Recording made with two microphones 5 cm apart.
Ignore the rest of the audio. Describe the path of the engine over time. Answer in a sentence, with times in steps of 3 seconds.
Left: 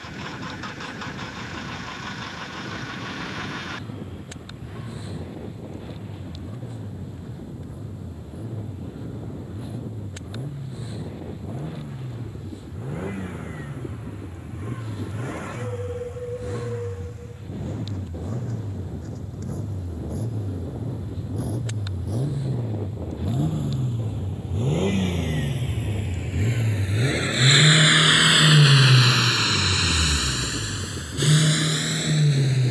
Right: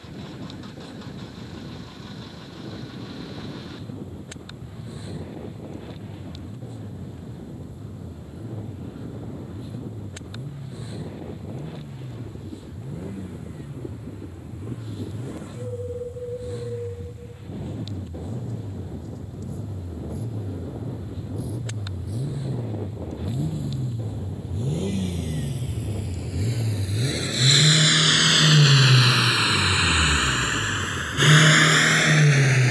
You can hear the engine on the left from 0 s, in the centre from 27 s and on the right from 30 s.